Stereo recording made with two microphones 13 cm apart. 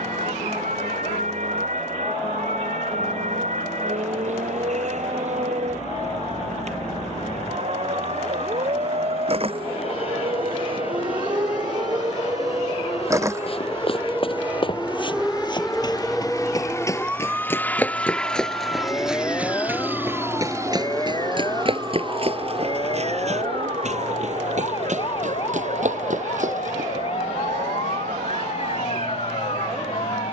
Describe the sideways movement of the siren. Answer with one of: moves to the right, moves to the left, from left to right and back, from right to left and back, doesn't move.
moves to the left.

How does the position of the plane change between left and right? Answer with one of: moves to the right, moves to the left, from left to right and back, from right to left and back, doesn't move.
moves to the right.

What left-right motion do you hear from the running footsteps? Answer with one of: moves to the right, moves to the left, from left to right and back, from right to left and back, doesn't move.
moves to the right.